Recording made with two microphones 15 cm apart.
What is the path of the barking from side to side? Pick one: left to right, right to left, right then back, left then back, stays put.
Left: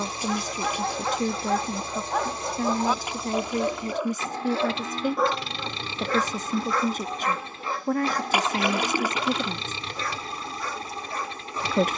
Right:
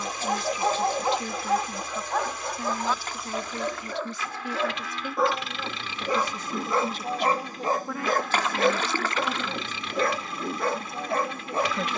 left then back.